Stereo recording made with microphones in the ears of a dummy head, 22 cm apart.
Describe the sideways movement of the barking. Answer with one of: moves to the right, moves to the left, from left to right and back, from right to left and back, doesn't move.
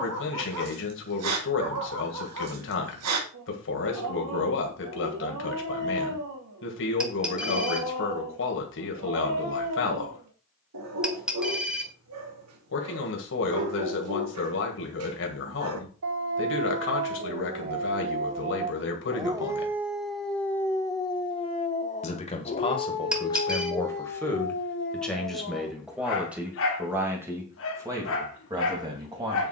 moves to the left.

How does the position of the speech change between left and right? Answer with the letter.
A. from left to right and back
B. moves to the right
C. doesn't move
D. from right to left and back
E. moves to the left
B.